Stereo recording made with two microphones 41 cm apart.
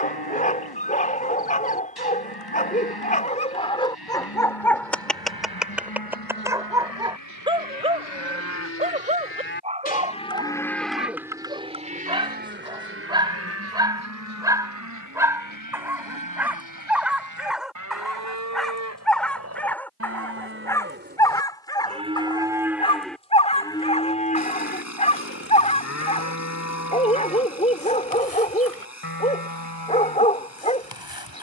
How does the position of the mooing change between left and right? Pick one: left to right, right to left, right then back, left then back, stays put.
right then back.